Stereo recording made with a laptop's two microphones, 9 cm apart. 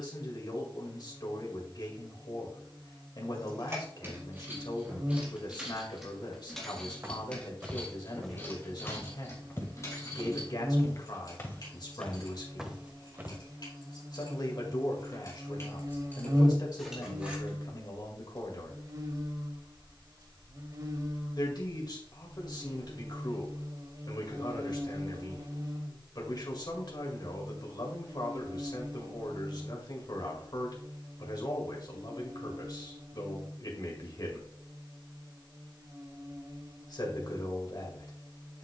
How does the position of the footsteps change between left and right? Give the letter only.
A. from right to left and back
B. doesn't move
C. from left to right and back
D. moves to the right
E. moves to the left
A.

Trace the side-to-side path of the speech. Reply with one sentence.
In this clip you hear the speech stay in one place.